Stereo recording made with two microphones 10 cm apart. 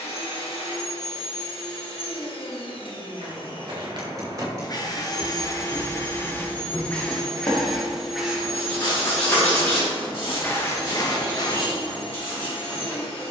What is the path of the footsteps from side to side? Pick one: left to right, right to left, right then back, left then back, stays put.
right to left.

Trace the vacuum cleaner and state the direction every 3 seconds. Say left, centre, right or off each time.
left, left, centre, left, left.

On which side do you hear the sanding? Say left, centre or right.
left.